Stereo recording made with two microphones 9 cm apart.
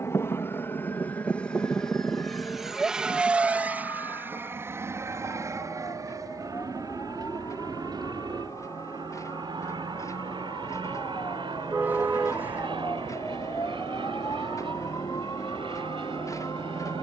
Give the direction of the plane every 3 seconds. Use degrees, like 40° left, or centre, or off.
10° left, 30° right, 50° right, 60° right, 60° right, 60° right.